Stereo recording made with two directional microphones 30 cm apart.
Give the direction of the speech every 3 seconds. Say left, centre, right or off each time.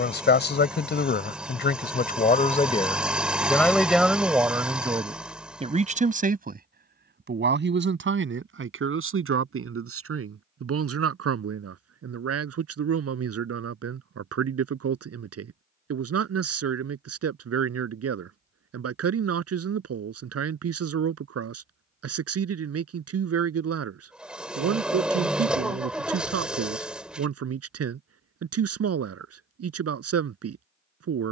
left, centre, right, right, right, right, right, right, right, right, right.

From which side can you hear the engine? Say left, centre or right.
centre.